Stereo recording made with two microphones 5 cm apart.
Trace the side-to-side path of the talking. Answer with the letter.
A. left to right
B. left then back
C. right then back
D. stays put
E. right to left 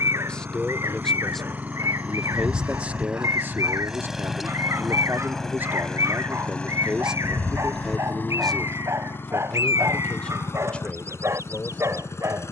C.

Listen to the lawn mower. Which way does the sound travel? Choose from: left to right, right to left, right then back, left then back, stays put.
right to left.